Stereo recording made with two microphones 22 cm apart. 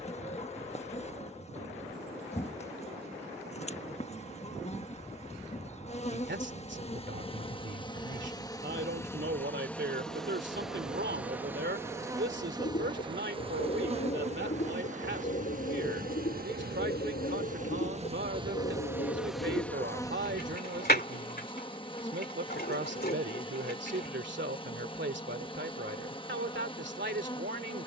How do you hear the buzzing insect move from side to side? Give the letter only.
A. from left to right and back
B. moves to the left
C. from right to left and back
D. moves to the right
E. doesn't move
A.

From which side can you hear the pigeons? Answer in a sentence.
In this clip you hear the pigeons on the left.